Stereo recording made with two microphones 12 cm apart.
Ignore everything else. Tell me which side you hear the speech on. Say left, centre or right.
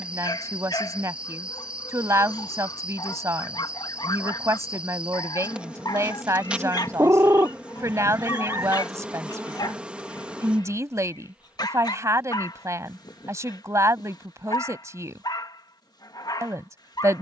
right.